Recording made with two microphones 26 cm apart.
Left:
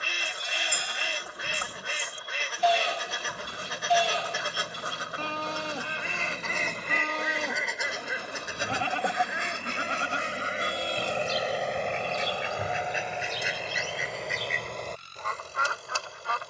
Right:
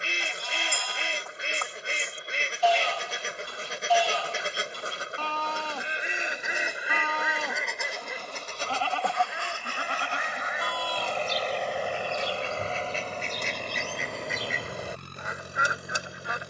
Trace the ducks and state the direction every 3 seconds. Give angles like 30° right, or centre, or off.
30° right, 30° right, centre, 30° left, 10° left, 20° right.